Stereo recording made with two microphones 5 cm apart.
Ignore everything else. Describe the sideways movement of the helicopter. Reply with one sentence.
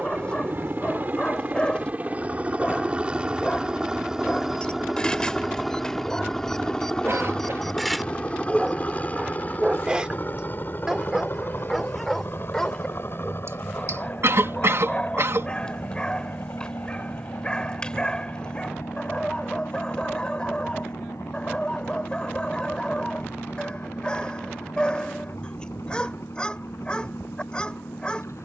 In this clip you hear the helicopter move from right to left.